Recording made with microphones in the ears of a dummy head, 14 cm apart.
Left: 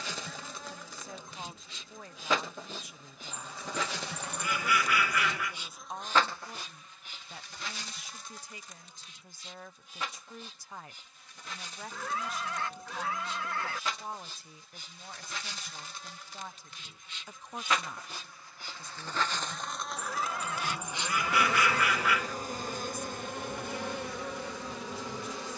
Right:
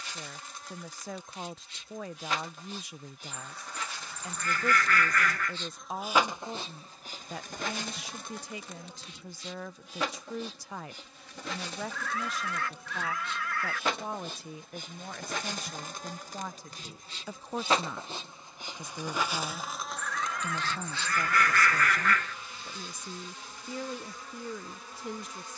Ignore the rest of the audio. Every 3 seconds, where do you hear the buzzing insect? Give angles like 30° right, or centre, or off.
70° left, 40° left, 40° right, 60° right, 50° right, 40° right, 10° right, 40° left, 60° left.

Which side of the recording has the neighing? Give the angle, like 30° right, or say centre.
20° left.